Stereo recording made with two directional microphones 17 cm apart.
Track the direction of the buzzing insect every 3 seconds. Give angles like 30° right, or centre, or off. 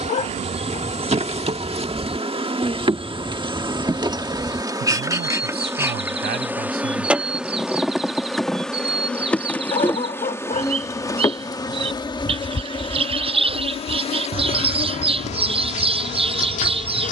40° right, 20° right, centre, 20° left, 30° left, 40° left.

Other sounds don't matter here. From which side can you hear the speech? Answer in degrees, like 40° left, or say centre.
70° right.